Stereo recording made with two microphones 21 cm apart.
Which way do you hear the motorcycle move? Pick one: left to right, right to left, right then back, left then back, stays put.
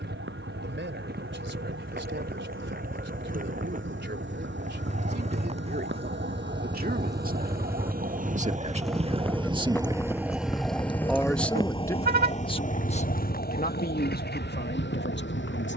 right to left.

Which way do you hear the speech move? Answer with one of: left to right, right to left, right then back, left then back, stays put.
right to left.